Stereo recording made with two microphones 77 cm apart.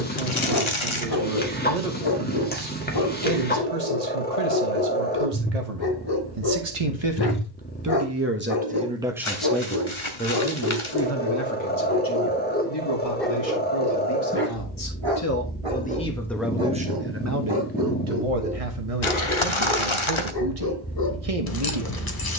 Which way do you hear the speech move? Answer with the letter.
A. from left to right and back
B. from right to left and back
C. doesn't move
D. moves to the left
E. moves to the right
B.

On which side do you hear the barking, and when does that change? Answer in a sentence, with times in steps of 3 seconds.
In this clip you hear the barking on the left from 0 s, in the centre from 12 s, on the right from 15 s, in the centre from 18 s and on the left from 21 s.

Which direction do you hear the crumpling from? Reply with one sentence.
In this clip you hear the crumpling on the left.